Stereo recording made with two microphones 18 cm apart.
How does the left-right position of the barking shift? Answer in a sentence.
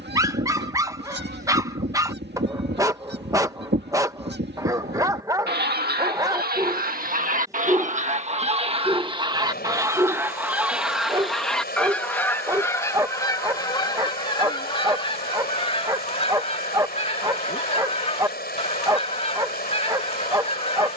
In this clip you hear the barking stay put.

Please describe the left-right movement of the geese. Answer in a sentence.
In this clip you hear the geese go from the right side to the left.